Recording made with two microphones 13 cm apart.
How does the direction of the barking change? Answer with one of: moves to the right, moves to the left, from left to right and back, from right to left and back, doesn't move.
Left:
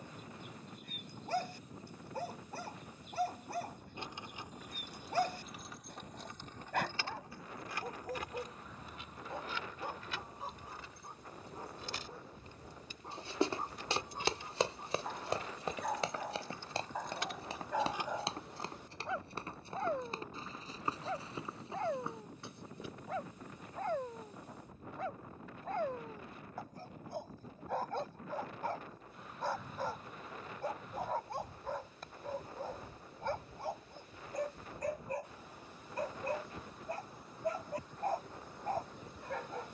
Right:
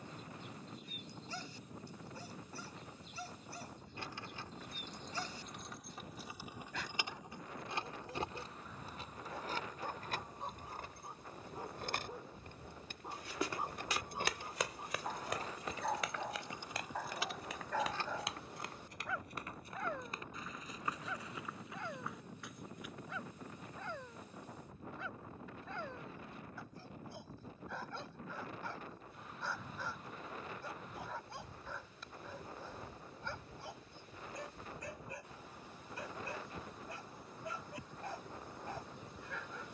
from left to right and back.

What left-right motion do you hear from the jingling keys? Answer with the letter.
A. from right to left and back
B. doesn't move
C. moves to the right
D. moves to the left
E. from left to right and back
E.